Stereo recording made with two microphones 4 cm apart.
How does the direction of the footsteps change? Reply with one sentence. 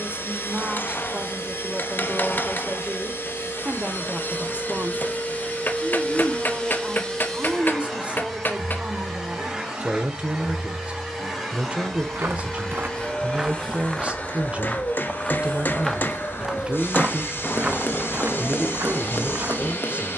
You can hear the footsteps move from right to left and back again.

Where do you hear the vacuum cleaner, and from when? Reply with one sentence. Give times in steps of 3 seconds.
You can hear the vacuum cleaner on the left from 0 s, in the centre from 6 s and on the left from 12 s.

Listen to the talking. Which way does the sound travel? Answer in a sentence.
You can hear the talking stay in one place.